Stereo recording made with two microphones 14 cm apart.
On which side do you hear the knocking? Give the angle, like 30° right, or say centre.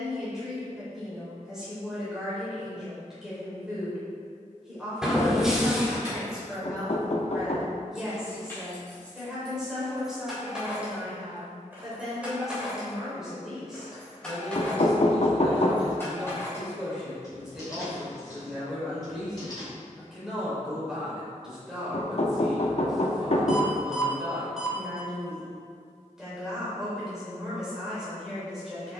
50° left.